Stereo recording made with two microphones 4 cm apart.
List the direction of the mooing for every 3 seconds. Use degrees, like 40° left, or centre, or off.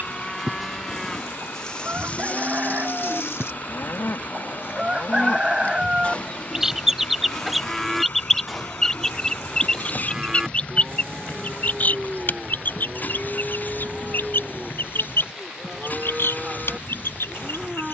20° left, 60° left, 10° left, 10° right, 10° right, 10° right.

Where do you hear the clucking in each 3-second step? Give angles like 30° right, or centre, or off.
40° right, 30° right, centre, 30° left, 50° left, 70° left.